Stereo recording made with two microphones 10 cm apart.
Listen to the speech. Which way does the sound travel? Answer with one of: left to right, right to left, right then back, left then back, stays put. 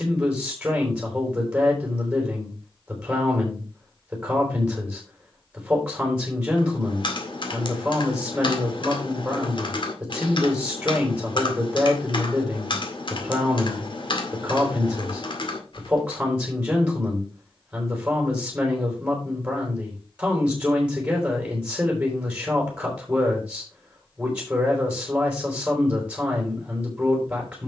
stays put.